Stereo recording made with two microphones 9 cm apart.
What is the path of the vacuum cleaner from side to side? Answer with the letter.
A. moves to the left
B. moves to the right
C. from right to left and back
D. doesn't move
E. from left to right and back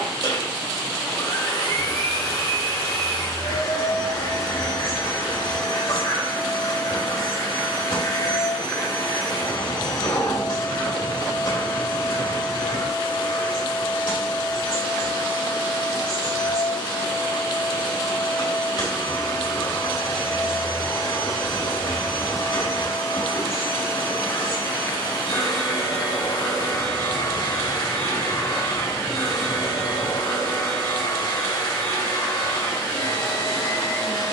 D.